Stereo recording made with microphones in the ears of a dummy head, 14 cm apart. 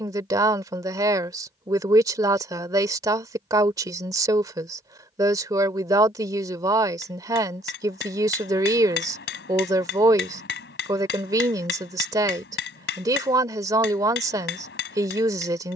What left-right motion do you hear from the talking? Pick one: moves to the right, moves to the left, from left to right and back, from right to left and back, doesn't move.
doesn't move.